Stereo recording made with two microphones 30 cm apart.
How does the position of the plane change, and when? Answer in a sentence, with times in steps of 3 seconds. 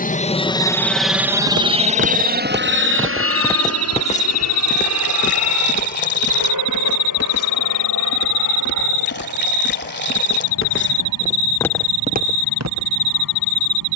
You can hear the plane in the centre from 0 s and on the right from 3 s.